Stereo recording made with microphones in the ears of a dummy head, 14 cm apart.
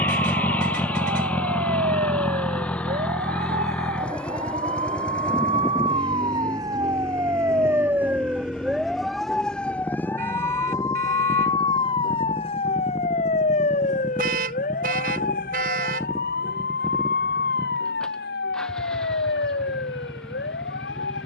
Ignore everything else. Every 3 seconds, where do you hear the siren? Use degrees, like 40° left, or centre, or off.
50° right, 40° right, 20° right, 20° left, 40° left, 60° left, 70° left.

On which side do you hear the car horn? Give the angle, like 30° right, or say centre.
60° right.